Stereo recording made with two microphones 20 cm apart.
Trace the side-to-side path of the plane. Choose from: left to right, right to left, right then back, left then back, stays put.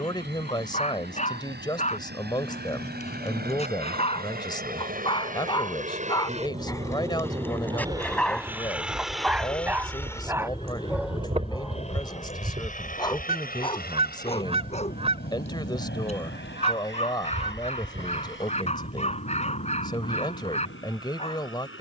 right to left.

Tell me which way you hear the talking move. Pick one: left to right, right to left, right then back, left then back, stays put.
stays put.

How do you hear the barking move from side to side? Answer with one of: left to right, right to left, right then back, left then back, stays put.
right then back.